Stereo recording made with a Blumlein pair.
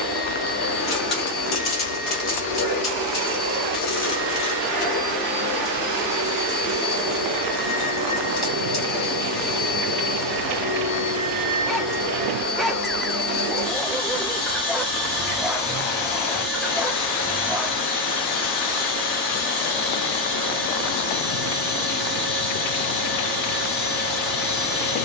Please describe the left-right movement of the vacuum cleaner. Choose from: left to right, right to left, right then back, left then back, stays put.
stays put.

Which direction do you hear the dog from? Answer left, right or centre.
centre.